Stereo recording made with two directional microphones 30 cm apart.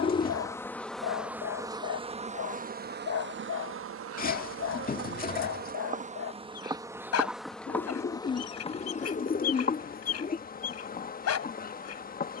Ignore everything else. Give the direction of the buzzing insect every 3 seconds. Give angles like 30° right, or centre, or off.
10° right, 40° right, centre, 30° left.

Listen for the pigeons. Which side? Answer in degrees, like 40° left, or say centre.
30° left.